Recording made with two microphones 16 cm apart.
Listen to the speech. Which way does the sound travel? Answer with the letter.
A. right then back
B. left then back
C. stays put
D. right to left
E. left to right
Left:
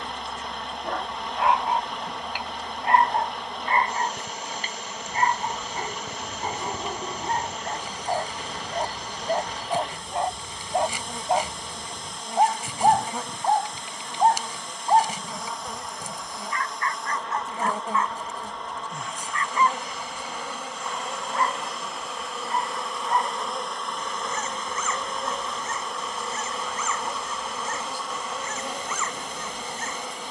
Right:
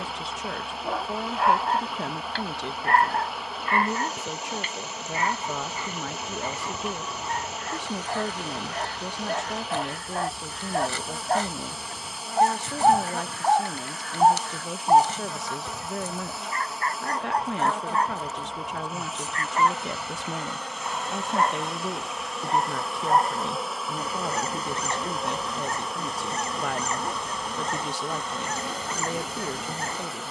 C.